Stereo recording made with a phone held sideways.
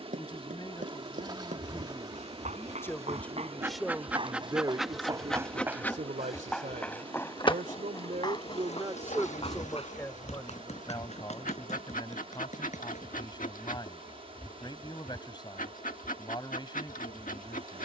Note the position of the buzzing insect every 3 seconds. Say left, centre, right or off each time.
right, centre, left, left, left, left.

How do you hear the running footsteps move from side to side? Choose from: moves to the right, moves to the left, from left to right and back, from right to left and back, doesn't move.
moves to the left.